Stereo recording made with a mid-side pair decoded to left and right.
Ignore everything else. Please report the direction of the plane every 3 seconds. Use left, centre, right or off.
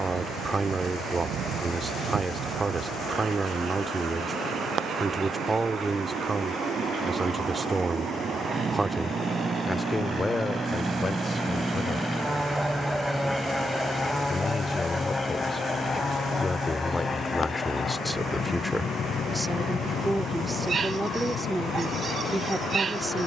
right, right, right, right, centre, left, left, left.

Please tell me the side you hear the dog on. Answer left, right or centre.
right.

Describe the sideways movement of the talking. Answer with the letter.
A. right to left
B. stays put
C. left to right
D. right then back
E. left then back
E.